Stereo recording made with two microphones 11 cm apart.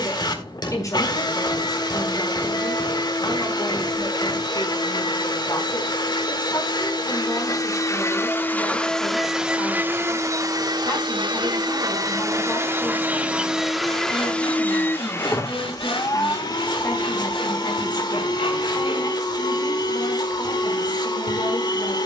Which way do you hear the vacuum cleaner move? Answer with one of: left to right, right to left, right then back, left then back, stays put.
right then back.